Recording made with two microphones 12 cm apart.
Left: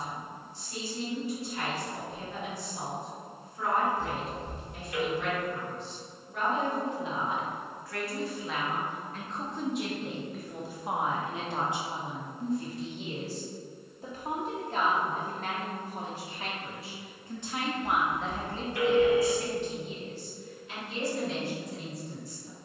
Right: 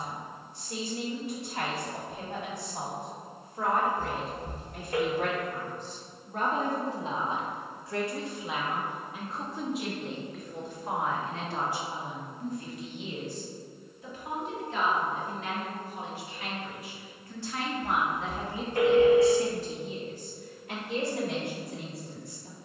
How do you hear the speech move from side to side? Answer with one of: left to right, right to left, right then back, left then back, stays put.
left then back.